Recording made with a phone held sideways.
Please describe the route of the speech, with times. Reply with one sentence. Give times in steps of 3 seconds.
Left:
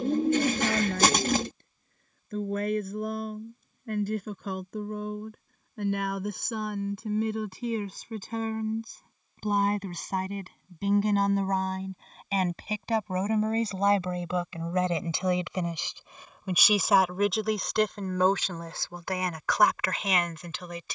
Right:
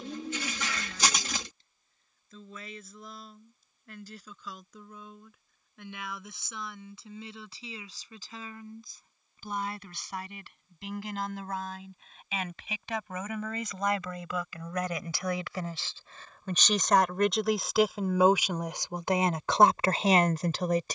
In this clip you hear the speech on the left from 0 s, in the centre from 15 s and on the right from 18 s.